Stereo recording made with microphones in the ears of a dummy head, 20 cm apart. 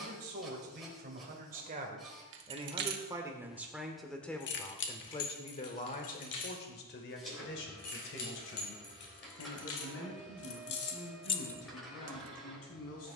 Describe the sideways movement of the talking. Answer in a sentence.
You can hear the talking travel towards the left.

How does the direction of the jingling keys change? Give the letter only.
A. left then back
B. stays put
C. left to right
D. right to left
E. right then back
A.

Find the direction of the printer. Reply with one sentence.
You can hear the printer in the centre.